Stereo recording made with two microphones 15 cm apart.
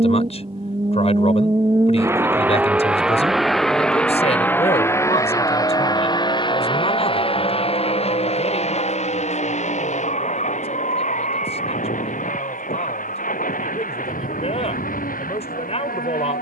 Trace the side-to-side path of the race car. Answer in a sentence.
You can hear the race car move from right to left.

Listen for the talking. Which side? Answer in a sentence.
In this clip you hear the talking on the left.